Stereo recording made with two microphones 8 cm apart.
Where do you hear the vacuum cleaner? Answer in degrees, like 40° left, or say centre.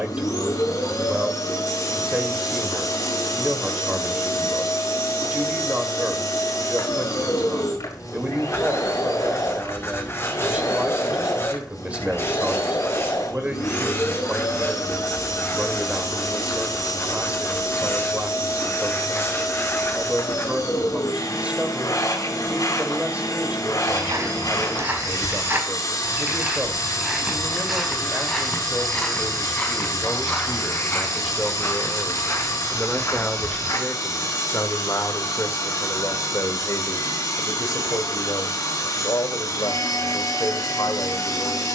50° left.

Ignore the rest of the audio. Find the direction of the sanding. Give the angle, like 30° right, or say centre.
30° left.